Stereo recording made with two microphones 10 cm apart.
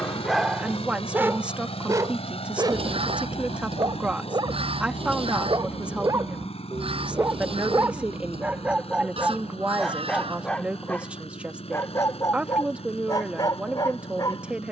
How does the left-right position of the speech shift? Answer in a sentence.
In this clip you hear the speech stay put.